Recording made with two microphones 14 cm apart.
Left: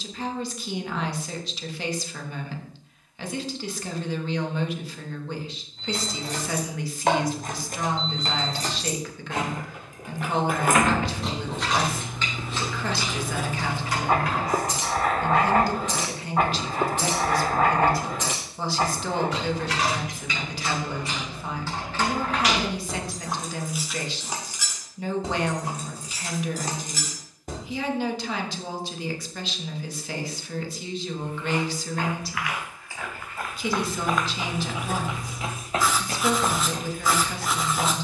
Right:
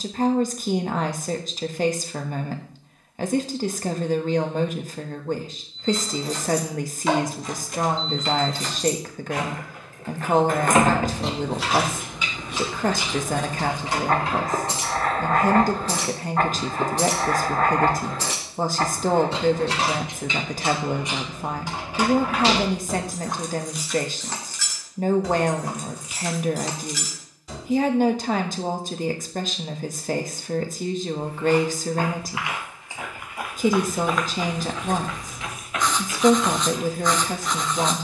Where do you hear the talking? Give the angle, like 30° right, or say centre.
40° right.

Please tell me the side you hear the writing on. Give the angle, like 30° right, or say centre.
10° left.